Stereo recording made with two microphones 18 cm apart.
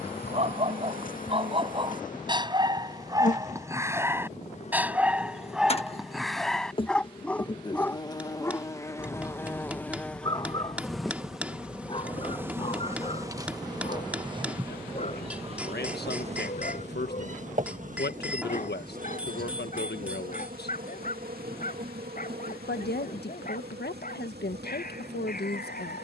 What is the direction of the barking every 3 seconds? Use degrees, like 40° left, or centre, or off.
30° right, 10° right, 10° left, 20° left, 30° left, 40° left, 50° left, 50° left, 50° left.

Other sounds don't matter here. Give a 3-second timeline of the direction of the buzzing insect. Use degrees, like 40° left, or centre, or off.
50° left, 40° left, 30° left, centre, 20° right, 40° right, 50° right, 60° right, 70° right.